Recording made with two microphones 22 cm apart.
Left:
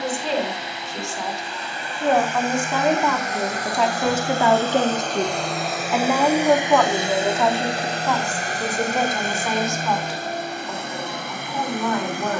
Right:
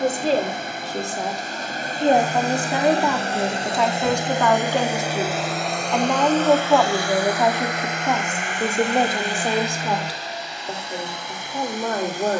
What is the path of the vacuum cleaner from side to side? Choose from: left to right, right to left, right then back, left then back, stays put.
right to left.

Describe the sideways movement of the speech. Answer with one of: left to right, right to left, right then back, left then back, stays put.
left then back.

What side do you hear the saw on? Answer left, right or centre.
right.